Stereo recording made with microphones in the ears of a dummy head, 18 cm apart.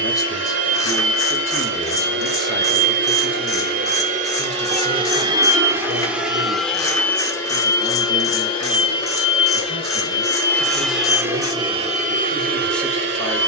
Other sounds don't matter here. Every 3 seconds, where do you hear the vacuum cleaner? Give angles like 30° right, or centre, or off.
60° right, 30° right, 10° left, 10° left, 50° right.